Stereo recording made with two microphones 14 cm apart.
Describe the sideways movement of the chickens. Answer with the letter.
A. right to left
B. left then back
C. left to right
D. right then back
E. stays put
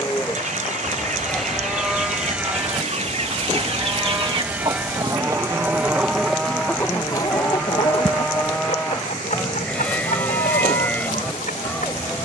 A.